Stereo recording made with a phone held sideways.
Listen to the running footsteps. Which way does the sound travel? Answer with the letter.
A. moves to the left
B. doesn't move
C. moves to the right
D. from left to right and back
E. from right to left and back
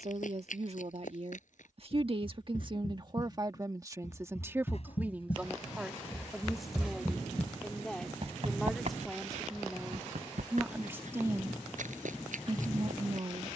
C.